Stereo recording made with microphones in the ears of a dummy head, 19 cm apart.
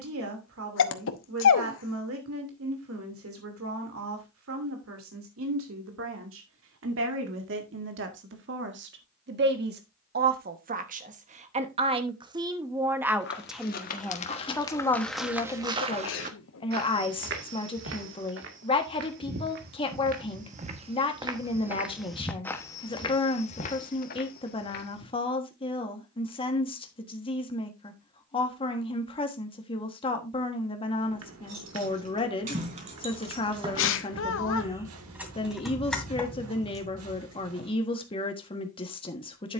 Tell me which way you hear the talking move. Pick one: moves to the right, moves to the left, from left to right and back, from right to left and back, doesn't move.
moves to the left.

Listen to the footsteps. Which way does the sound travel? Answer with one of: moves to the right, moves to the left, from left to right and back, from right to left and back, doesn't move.
from left to right and back.